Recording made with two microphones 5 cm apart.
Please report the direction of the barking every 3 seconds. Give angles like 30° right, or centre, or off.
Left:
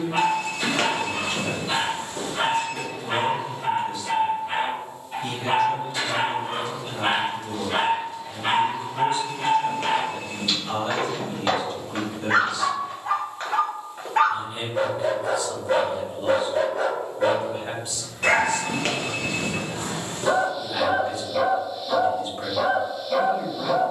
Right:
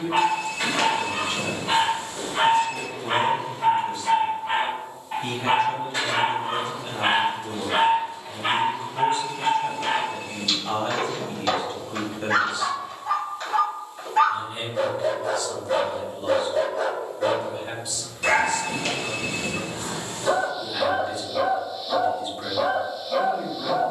50° right, 40° right, 20° right, 10° left, 40° left, 40° left, 40° left, 40° left.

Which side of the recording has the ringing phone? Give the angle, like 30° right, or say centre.
40° left.